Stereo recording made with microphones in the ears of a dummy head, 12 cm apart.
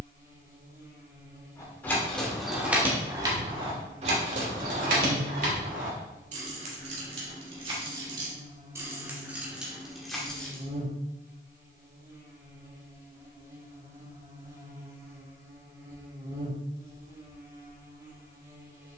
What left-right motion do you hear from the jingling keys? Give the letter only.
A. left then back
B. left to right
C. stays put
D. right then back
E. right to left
D.